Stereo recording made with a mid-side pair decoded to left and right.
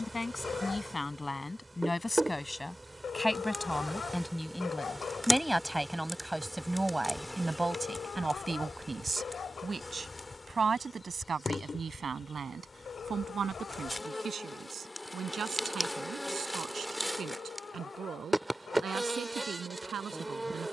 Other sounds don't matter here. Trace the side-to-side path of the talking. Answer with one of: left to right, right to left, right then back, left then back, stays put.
left to right.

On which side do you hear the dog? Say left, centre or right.
left.